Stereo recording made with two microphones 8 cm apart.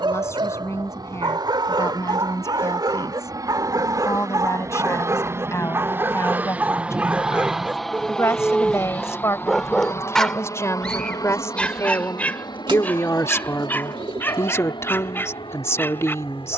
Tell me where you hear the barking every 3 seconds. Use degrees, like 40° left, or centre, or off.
70° right, 50° right, 20° right, 10° left, 20° left, 30° left.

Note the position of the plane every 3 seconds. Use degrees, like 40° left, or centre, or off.
60° right, 40° right, centre, 40° left, 60° left, 70° left.